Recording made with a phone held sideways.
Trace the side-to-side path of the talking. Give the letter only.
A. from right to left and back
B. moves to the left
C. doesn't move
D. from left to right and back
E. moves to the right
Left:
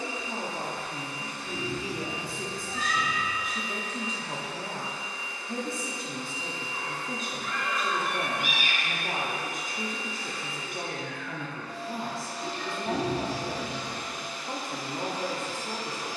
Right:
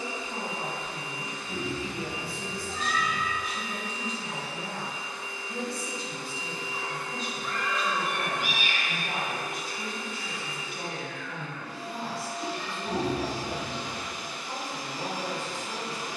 C.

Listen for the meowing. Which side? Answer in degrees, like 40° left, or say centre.
70° left.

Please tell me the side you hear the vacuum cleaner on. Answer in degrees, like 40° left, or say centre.
20° right.